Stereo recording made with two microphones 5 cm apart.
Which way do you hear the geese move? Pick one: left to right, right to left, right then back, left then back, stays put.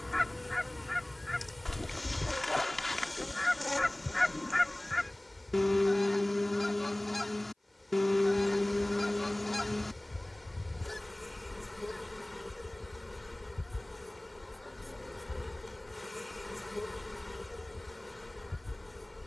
stays put.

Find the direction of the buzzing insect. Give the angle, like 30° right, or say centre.
centre.